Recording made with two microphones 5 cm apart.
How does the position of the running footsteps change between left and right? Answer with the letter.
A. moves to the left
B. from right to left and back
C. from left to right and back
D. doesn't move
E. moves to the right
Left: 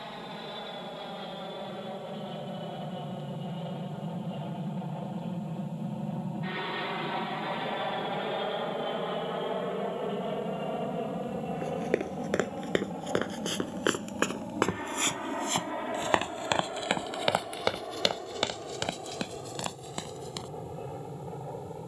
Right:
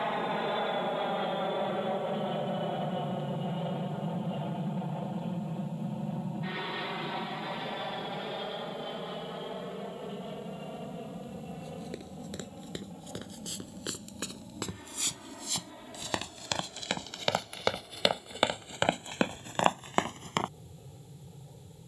E.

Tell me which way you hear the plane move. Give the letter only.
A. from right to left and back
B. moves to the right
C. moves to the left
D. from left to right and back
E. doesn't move
C.